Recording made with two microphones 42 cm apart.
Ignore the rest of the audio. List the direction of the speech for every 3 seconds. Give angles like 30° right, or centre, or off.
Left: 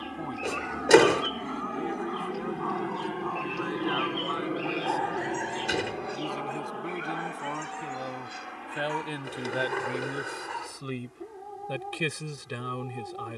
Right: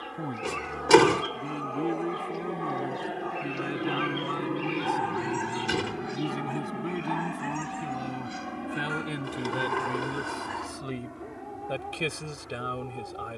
40° right, 40° right, 30° right, 10° right, 10° left.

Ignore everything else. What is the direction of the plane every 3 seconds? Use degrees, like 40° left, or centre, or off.
40° left, centre, 40° right, 60° right, 70° right.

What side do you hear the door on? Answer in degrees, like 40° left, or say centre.
20° right.